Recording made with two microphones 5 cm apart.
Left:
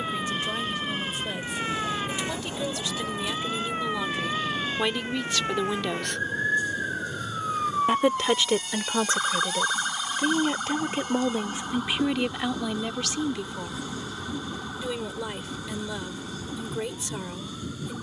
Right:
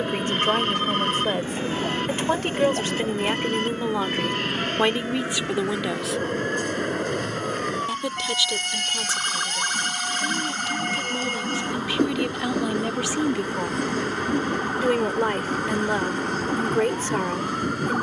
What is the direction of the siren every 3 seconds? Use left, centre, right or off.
left, left, left, centre, right, right.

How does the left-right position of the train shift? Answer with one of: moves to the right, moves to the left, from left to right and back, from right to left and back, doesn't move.
doesn't move.